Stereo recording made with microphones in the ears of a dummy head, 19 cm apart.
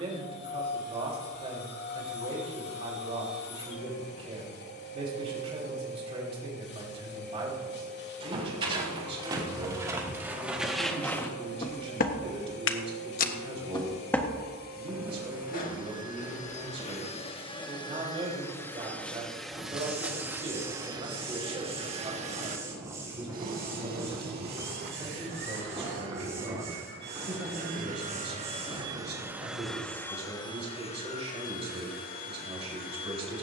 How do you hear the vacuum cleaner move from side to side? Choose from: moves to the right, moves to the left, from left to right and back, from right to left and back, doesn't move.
from left to right and back.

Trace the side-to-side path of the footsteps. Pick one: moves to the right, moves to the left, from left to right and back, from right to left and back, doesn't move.
from right to left and back.